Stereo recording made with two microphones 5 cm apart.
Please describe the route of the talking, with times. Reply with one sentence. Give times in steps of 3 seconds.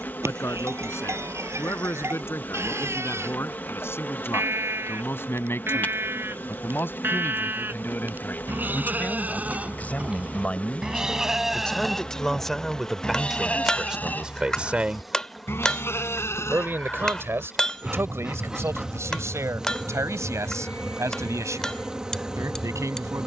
In this clip you hear the talking on the left from 0 s, in the centre from 12 s and on the right from 15 s.